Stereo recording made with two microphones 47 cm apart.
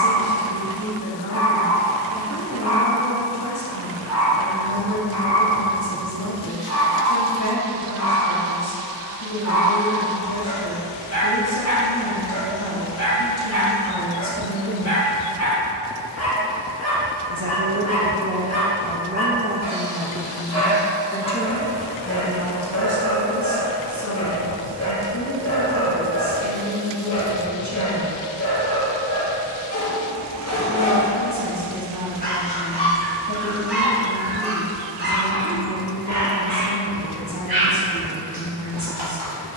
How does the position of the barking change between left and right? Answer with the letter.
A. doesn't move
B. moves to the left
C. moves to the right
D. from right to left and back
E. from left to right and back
C.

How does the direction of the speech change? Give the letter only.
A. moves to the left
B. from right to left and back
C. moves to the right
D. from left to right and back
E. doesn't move
D.